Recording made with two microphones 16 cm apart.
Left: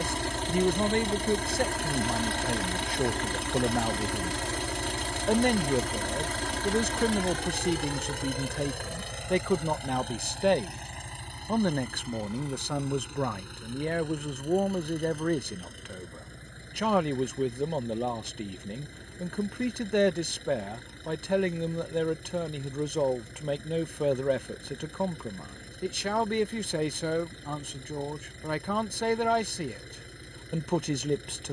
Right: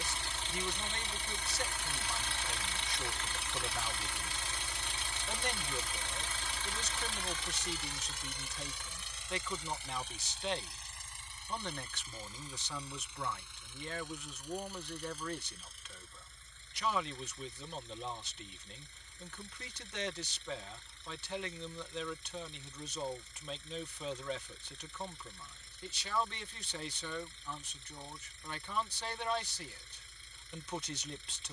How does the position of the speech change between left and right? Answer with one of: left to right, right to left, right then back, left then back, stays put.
stays put.